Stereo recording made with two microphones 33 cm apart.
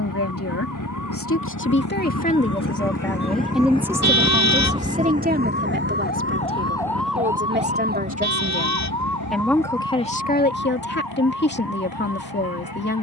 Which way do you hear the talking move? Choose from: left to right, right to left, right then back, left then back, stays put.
right then back.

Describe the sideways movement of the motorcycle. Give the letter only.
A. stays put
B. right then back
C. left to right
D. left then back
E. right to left
C.